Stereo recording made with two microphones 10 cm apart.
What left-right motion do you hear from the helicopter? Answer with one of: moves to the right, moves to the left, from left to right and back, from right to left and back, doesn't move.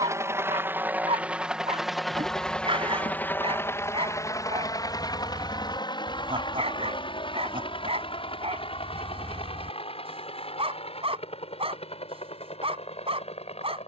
moves to the left.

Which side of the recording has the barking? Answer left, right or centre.
right.